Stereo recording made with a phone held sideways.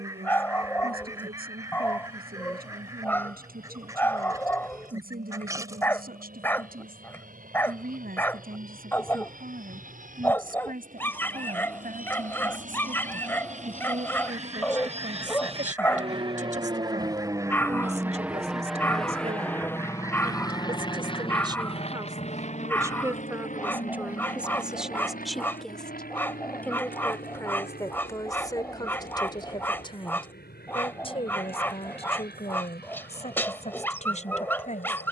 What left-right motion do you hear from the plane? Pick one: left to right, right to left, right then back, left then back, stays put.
right to left.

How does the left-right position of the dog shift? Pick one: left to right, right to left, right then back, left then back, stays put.
stays put.